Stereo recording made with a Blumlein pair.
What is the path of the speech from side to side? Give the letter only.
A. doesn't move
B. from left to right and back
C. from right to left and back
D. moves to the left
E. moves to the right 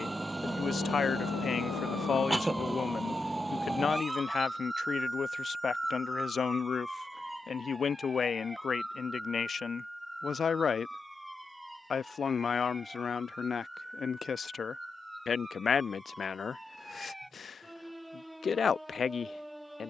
A.